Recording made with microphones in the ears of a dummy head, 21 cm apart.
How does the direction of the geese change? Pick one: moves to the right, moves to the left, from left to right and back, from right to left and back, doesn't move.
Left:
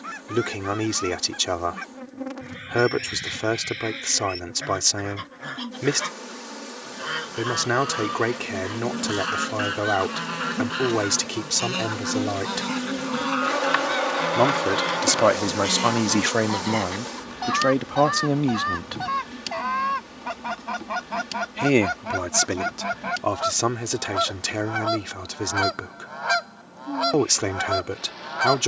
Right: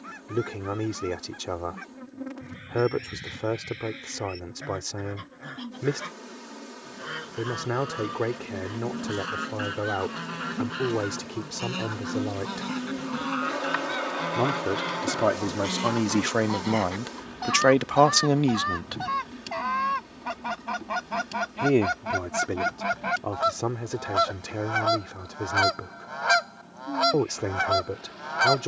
moves to the right.